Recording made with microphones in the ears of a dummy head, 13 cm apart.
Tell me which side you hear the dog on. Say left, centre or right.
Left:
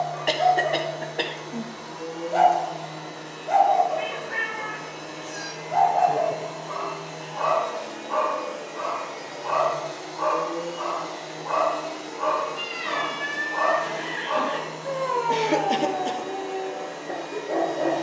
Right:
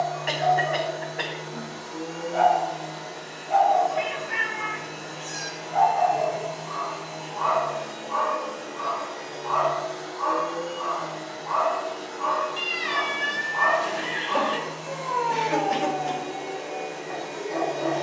left.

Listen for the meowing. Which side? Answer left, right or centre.
right.